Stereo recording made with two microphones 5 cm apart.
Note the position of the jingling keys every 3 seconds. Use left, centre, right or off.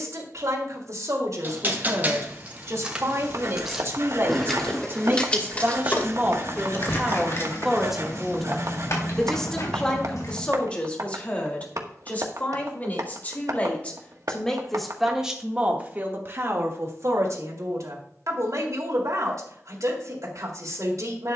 right, centre, left, left, off, off, off.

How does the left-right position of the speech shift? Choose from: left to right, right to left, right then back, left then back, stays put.
left then back.